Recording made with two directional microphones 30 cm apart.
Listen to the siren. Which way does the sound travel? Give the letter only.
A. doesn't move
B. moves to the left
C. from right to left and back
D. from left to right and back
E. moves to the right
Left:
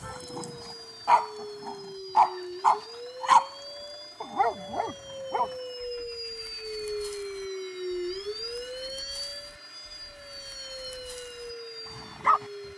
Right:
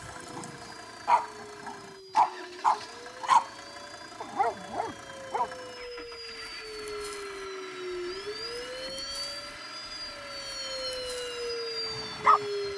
E.